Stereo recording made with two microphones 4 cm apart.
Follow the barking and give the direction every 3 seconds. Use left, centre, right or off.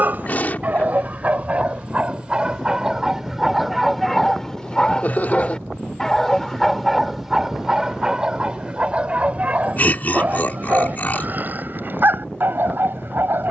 right, centre, centre, right, right.